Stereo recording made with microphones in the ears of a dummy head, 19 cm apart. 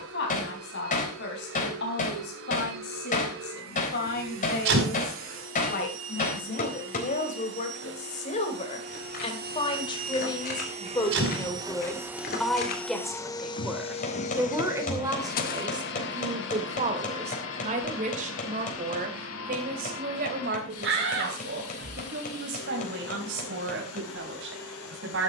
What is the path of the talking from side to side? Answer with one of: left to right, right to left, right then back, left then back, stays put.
left to right.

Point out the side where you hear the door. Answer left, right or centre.
right.